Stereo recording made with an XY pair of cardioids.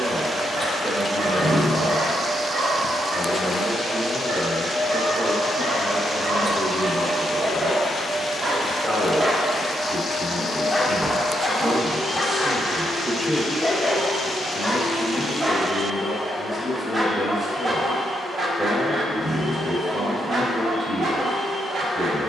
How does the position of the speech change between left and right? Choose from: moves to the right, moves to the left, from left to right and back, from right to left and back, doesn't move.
doesn't move.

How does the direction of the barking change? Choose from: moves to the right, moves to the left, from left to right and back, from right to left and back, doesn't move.
from right to left and back.